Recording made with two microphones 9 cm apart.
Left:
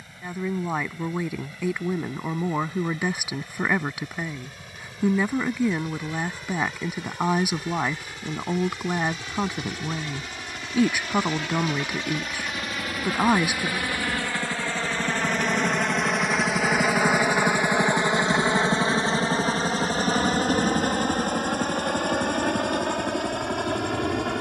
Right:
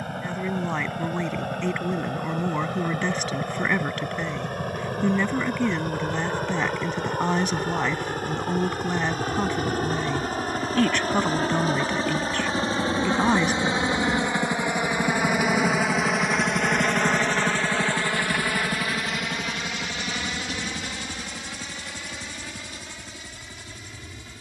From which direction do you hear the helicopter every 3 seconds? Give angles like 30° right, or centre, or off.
60° right, 60° right, 50° right, 40° right, 30° right, centre, 30° left, 50° left.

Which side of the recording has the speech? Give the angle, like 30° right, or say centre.
10° left.